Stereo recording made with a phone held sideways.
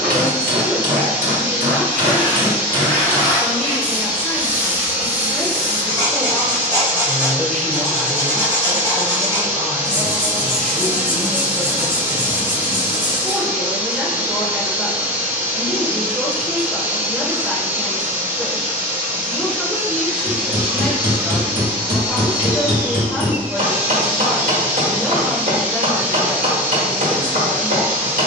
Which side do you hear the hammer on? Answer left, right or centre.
right.